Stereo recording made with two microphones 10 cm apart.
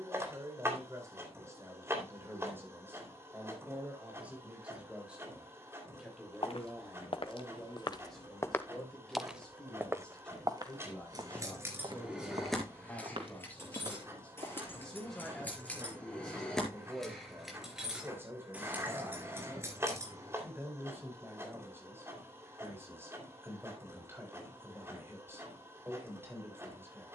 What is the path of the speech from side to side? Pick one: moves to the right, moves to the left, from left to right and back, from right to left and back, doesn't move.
from right to left and back.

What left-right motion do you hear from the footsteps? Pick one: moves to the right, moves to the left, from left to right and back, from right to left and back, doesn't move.
moves to the right.